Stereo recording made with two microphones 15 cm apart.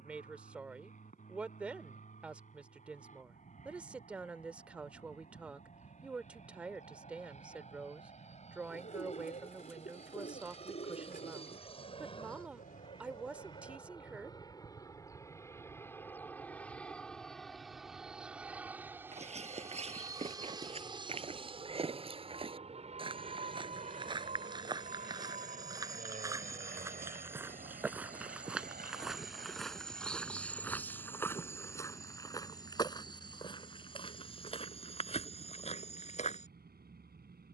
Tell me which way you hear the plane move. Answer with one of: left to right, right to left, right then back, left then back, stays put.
left to right.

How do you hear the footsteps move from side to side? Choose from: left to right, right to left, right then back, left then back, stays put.
right to left.